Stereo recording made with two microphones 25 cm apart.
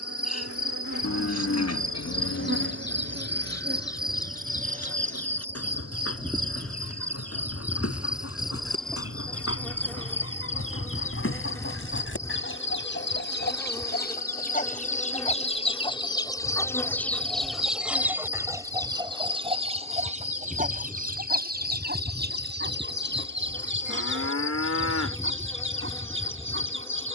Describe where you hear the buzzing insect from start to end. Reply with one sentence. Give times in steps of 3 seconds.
In this clip you hear the buzzing insect on the right from 0 s and in the centre from 6 s.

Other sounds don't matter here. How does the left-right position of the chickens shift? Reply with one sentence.
You can hear the chickens go from the left side to the right.